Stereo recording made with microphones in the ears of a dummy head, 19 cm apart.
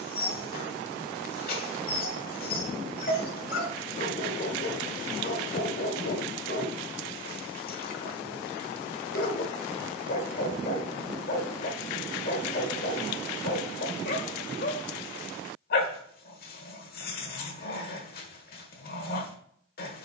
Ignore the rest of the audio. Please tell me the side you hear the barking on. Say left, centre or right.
left.